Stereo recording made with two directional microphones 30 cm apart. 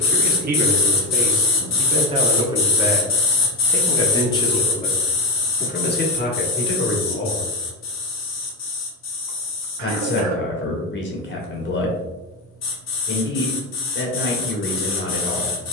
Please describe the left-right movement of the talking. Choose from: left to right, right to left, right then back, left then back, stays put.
right to left.